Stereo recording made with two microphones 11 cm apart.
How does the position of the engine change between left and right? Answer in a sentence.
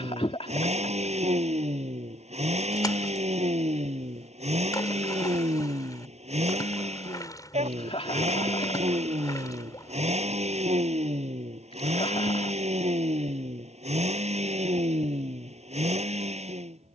In this clip you hear the engine stay put.